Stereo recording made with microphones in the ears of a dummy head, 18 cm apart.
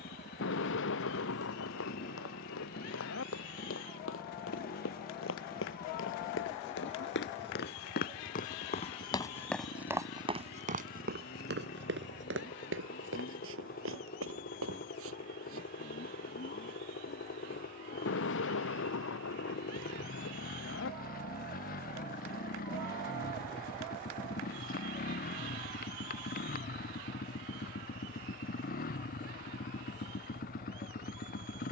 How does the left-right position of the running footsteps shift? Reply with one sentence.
You can hear the running footsteps travel towards the right.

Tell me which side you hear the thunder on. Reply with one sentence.
You can hear the thunder on the left.